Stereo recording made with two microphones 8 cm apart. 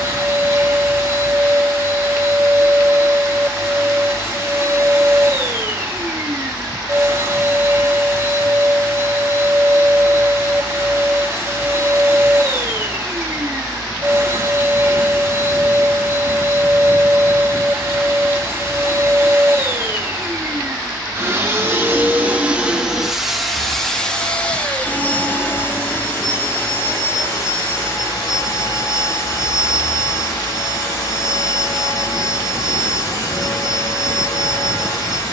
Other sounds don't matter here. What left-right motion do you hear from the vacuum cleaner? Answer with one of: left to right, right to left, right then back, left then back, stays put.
right to left.